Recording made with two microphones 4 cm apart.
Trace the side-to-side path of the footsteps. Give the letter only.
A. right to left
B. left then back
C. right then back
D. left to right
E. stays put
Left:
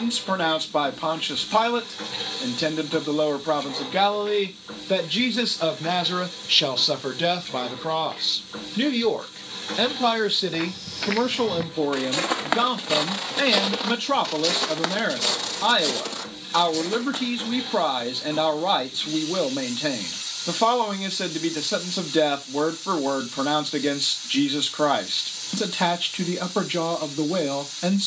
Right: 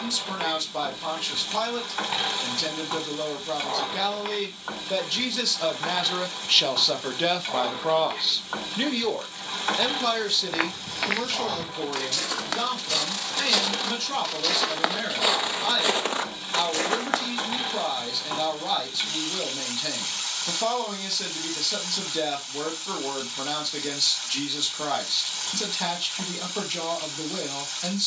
B.